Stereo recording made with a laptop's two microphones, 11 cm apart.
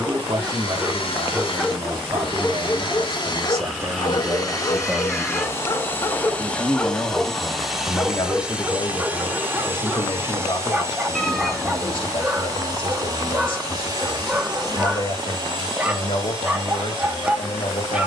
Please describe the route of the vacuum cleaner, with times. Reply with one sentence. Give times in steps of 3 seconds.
You can hear the vacuum cleaner on the left from 0 s, in the centre from 6 s and on the right from 9 s.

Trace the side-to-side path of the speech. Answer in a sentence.
You can hear the speech move from right to left.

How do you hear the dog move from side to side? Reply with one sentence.
In this clip you hear the dog go left and come back.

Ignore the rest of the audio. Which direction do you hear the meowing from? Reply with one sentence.
You can hear the meowing in the centre.